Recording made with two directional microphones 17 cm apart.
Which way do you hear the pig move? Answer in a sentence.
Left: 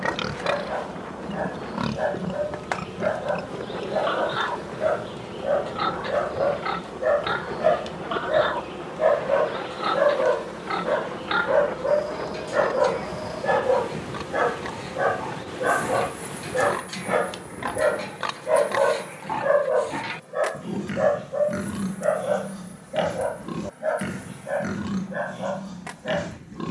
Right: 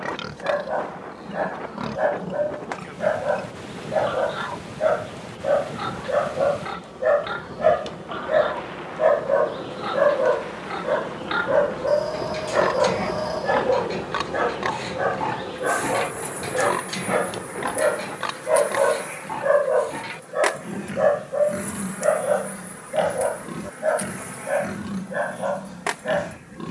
You can hear the pig move from left to right and back again.